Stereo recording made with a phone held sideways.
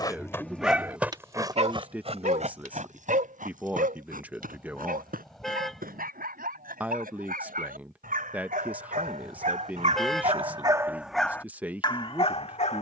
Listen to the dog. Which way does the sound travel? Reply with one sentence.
You can hear the dog move from left to right and back again.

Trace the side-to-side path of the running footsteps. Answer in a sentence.
In this clip you hear the running footsteps move from left to right.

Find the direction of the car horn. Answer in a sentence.
You can hear the car horn in the centre.